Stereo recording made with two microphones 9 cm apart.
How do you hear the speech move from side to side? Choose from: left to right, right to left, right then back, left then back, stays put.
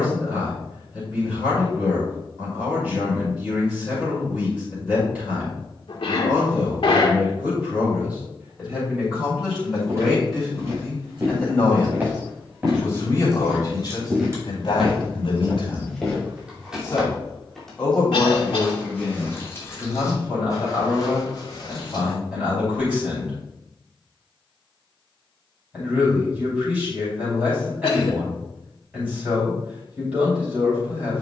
left then back.